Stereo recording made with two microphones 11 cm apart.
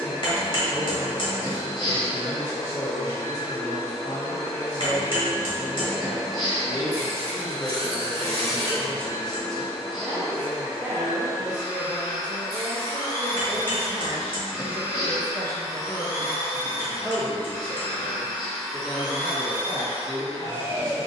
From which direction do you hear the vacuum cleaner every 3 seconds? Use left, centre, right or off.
left, left, left, left, left, left, centre.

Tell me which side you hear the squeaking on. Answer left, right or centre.
right.